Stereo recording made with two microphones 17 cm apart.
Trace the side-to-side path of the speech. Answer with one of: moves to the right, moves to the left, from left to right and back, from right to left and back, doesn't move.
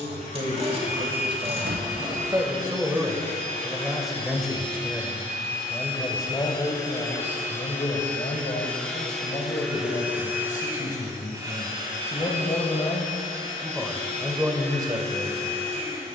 from right to left and back.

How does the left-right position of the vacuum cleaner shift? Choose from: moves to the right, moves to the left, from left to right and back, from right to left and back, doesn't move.
moves to the right.